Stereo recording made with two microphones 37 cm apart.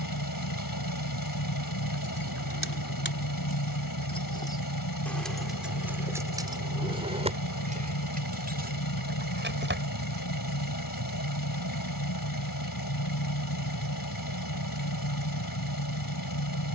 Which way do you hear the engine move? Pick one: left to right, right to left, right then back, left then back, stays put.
stays put.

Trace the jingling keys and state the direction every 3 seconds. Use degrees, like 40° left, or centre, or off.
40° left, 10° left, 20° right, 30° right, off, off.